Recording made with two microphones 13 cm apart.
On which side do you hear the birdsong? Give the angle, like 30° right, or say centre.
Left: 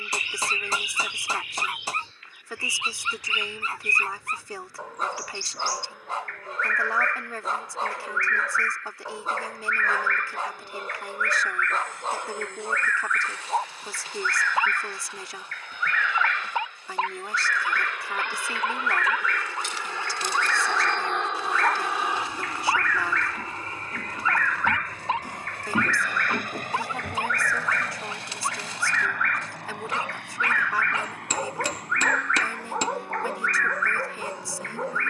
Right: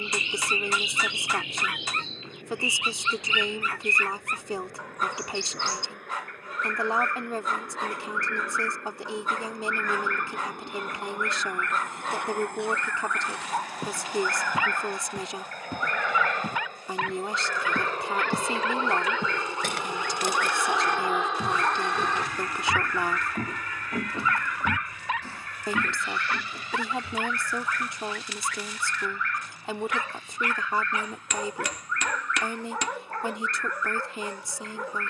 20° right.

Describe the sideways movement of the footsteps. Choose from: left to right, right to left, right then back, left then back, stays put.
right to left.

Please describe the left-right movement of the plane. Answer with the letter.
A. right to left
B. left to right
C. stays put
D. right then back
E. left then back
A.